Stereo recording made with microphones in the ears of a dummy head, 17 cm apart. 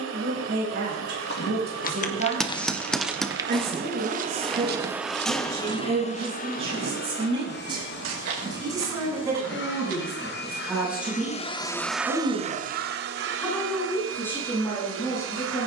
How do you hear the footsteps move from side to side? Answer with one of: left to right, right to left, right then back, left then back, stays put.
left to right.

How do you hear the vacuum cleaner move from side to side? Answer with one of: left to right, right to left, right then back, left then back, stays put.
left then back.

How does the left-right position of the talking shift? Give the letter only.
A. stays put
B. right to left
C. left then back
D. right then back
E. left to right
B.